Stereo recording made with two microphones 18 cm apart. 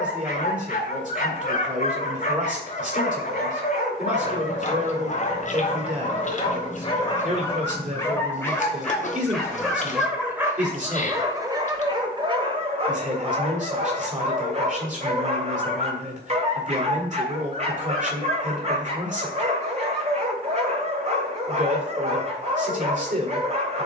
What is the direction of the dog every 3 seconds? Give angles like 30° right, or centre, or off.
40° left, 40° left, 20° left, 10° right, 40° right, 40° right, 40° right, 40° right.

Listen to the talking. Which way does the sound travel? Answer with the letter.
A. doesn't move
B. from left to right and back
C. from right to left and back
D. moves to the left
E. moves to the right
A.